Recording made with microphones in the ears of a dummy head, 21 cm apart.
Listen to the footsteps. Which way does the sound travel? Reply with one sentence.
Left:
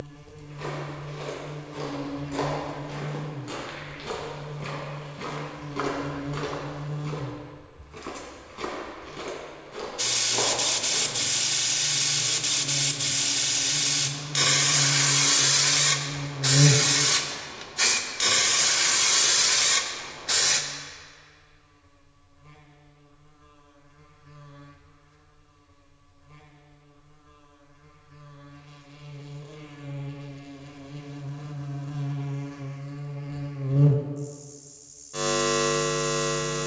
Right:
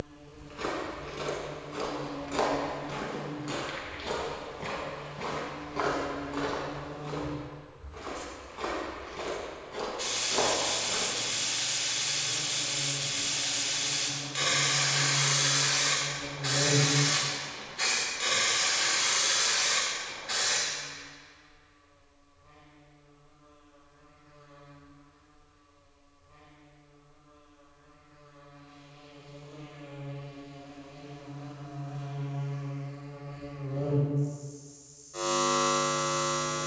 You can hear the footsteps go left and come back.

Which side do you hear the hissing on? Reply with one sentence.
In this clip you hear the hissing on the left.